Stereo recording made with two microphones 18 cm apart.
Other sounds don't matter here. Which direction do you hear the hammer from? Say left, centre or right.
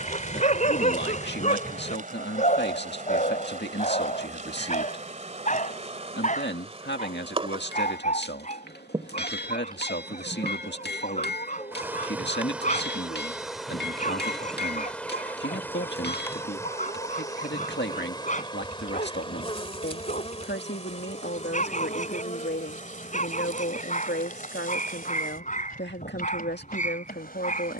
left.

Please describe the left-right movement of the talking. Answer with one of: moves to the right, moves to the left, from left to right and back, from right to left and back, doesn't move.
doesn't move.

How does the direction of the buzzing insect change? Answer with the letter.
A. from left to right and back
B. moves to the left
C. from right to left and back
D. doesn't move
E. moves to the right
B.